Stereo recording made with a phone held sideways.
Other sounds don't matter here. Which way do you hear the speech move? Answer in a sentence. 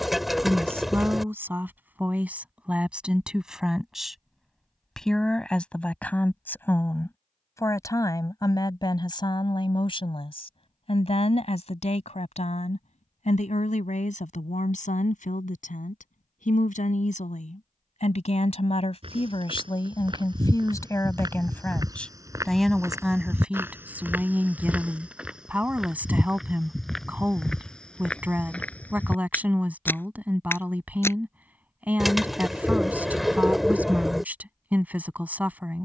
You can hear the speech move from right to left and back again.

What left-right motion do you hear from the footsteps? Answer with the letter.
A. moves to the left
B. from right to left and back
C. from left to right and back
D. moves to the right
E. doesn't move
A.